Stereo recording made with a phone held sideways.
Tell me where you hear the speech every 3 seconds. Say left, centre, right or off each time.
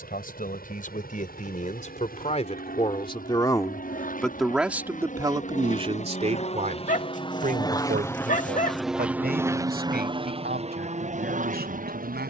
left, centre, right, right.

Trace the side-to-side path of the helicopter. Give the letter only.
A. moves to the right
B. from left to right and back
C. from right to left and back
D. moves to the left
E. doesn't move
A.